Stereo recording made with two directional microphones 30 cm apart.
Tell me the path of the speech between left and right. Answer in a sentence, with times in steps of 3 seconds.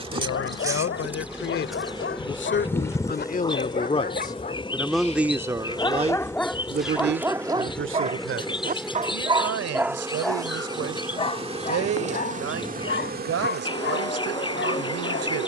You can hear the speech on the left from 0 s, in the centre from 3 s and on the right from 6 s.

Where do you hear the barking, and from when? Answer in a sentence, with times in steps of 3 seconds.
In this clip you hear the barking on the left from 0 s, in the centre from 6 s and on the left from 12 s.